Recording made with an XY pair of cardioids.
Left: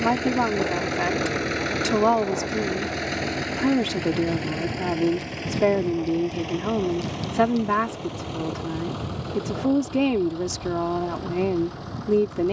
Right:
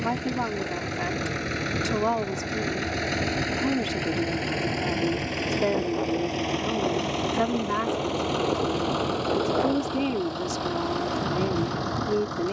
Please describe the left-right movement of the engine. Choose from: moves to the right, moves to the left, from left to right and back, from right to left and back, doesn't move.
moves to the right.